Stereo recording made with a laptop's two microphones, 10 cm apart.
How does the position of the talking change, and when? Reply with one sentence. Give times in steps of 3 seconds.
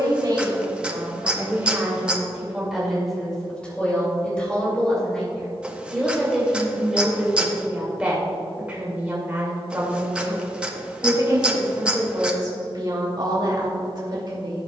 You can hear the talking on the right from 0 s, in the centre from 3 s and on the right from 9 s.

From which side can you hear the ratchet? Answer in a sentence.
In this clip you hear the ratchet in the centre.